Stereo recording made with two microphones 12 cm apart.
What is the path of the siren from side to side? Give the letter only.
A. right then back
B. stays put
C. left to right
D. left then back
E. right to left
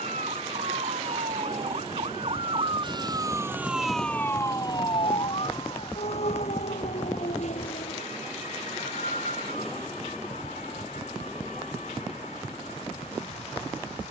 E.